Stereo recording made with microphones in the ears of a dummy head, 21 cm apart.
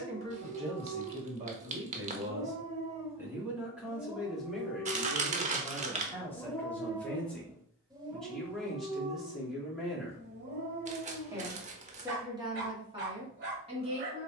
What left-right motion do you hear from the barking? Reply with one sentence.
You can hear the barking go left and come back.